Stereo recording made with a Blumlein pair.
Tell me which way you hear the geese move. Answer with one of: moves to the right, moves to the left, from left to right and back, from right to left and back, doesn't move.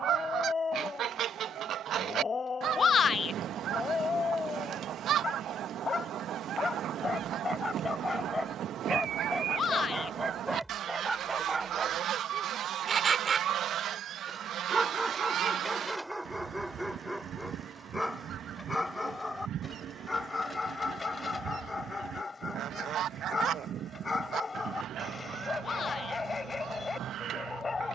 doesn't move.